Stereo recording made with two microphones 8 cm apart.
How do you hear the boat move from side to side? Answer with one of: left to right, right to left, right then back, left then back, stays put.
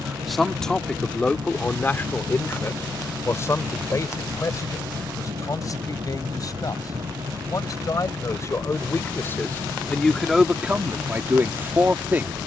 stays put.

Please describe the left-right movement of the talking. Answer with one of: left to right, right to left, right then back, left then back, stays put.
left then back.